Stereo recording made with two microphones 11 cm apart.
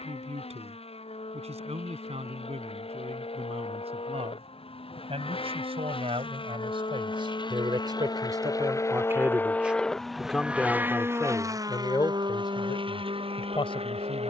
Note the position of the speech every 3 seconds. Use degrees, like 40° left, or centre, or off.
70° right, 70° right, 50° right, 10° left, 50° left.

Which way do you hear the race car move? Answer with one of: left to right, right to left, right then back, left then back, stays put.
left to right.